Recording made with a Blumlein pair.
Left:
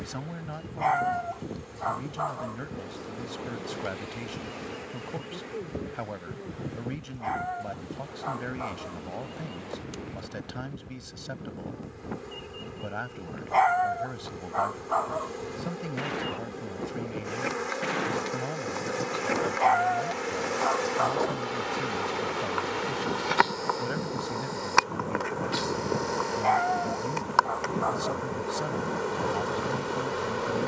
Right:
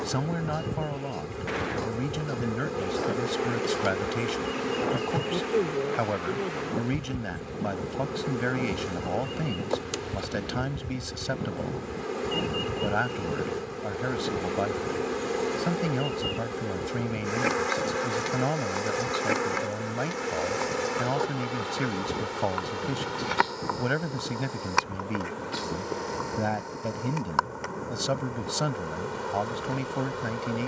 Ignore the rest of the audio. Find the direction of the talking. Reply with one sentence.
In this clip you hear the talking on the right.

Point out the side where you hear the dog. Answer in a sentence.
You can hear the dog on the left.